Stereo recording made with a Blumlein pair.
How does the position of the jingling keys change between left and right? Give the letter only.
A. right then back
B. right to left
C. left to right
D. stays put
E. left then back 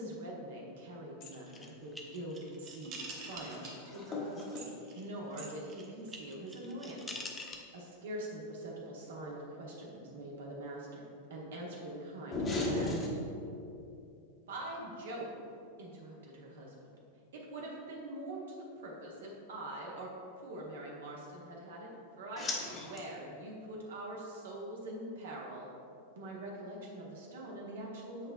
A.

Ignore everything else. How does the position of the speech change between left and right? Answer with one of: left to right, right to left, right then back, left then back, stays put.
stays put.